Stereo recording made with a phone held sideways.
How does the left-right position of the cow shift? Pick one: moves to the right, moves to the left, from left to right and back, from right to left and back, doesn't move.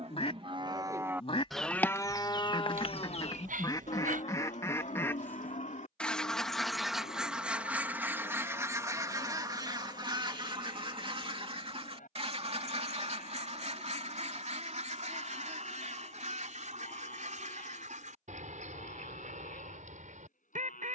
moves to the left.